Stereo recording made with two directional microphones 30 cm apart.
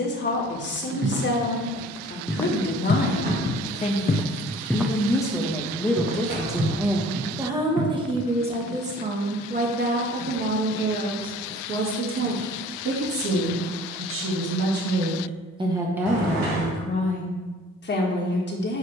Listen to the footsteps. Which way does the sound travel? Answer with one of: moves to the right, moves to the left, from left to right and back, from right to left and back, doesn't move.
from right to left and back.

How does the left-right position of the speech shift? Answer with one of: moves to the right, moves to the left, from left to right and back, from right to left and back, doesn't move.
from left to right and back.